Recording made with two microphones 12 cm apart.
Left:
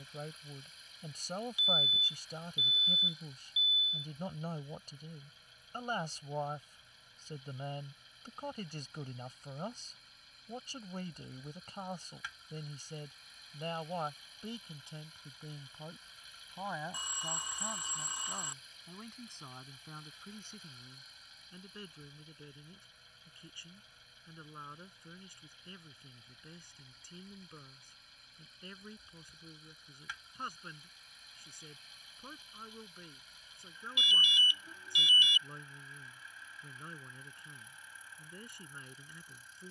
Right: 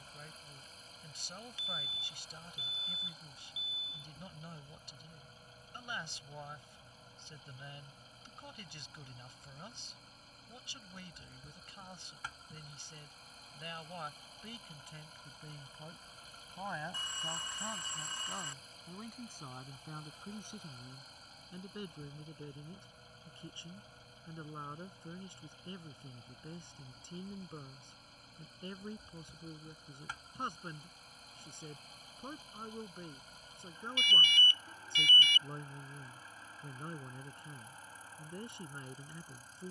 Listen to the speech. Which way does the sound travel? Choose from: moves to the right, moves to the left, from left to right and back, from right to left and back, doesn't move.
moves to the right.